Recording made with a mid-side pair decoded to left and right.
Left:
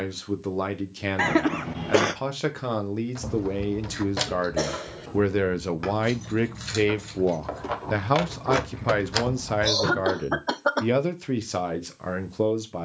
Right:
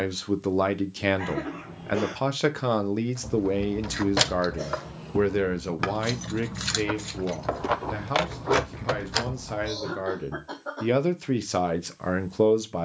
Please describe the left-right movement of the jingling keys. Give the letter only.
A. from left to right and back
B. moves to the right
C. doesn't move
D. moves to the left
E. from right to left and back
A.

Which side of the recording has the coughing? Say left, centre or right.
left.